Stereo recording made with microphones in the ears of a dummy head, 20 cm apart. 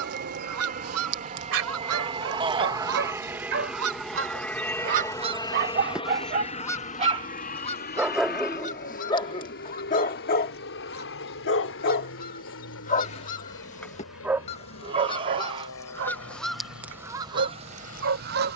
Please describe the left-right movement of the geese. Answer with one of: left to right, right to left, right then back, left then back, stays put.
left then back.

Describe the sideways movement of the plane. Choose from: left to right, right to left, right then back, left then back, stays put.
right to left.